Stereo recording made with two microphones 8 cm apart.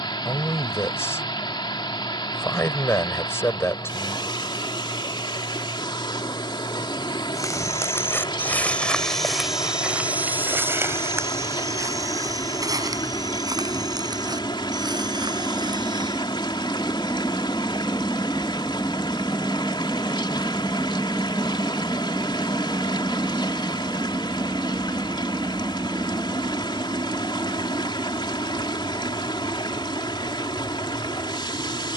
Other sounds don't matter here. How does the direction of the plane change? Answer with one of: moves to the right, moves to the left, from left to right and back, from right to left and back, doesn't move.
moves to the right.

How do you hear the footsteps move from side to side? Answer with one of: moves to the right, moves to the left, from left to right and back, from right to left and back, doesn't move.
moves to the right.